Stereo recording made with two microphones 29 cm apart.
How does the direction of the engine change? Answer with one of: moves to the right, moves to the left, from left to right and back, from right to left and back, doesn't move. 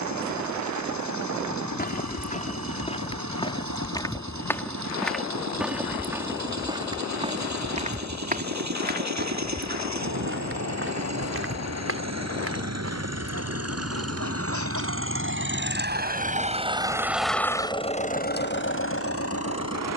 moves to the left.